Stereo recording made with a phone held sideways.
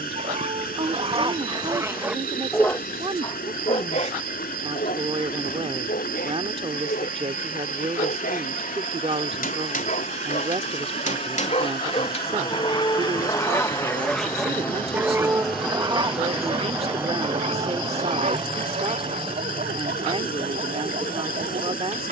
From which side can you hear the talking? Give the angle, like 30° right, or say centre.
40° right.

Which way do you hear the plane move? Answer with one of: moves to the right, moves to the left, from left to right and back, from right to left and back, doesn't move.
moves to the right.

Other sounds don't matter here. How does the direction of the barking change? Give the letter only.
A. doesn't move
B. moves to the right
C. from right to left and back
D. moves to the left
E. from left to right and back
C.